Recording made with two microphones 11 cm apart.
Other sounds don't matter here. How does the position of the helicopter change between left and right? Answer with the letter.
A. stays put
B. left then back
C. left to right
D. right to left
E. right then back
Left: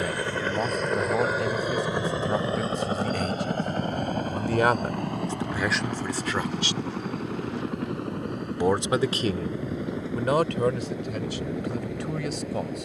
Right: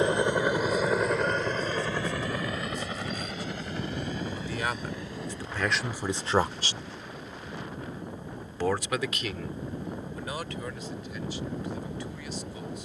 D.